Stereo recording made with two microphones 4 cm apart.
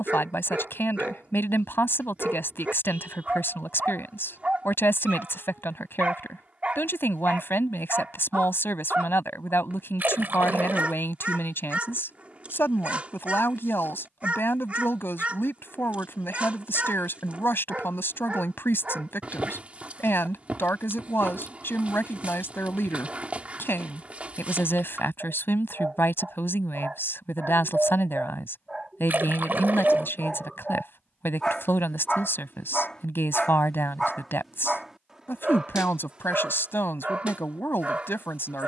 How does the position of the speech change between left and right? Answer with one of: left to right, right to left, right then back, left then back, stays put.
stays put.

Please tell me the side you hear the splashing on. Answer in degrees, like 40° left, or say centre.
50° right.